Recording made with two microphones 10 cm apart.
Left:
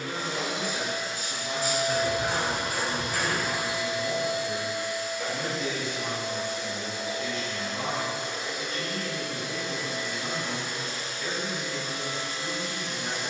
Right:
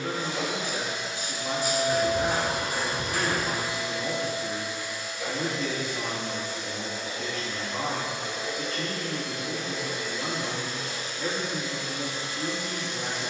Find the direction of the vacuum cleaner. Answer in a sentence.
In this clip you hear the vacuum cleaner on the left.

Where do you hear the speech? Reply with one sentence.
In this clip you hear the speech on the right.